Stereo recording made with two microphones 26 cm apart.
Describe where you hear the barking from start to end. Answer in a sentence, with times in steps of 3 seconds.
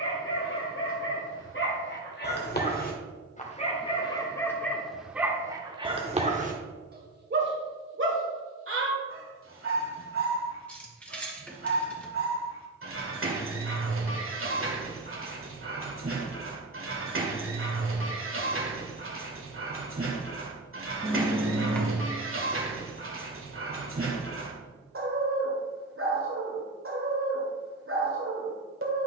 You can hear the barking on the left from 0 s, in the centre from 3 s and on the right from 6 s.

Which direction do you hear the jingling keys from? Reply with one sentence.
You can hear the jingling keys in the centre.